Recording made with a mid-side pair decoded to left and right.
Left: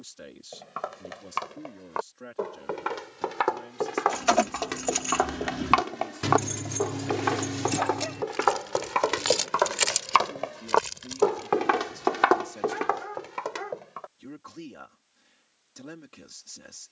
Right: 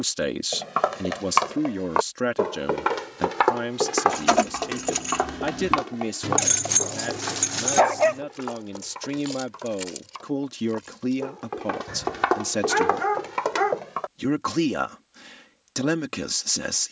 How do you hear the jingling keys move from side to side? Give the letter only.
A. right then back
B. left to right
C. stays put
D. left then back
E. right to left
E.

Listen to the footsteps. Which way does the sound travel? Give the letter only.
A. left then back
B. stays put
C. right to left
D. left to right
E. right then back
A.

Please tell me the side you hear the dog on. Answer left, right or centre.
right.